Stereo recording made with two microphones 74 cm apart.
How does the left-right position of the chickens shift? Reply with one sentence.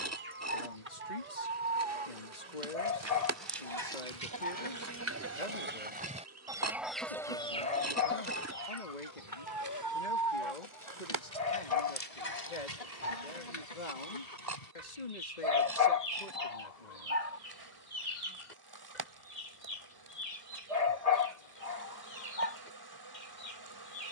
In this clip you hear the chickens move to the left.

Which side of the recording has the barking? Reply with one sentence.
You can hear the barking on the left.